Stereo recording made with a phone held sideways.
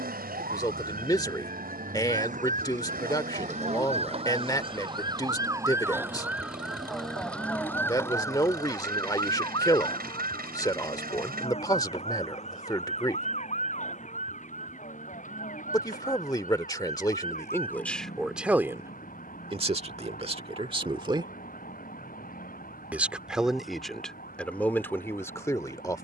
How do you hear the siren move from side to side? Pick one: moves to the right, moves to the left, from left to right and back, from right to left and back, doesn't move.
moves to the left.